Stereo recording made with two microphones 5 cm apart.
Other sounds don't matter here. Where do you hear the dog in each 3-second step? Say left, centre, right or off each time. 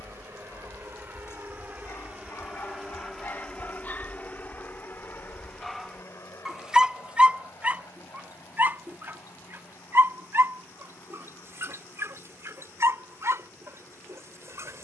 left, left, right, right, right.